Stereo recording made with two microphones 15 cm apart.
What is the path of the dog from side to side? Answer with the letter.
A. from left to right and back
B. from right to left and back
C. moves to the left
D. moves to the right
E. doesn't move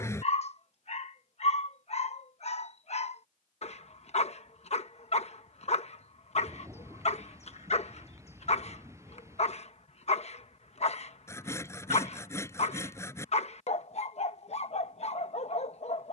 E.